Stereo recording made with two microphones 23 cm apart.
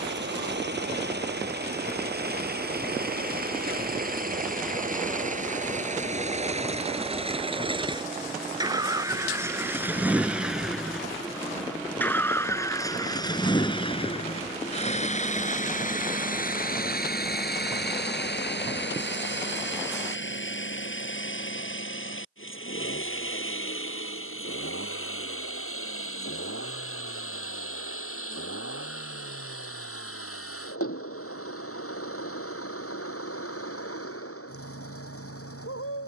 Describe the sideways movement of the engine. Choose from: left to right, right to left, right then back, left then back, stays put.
right to left.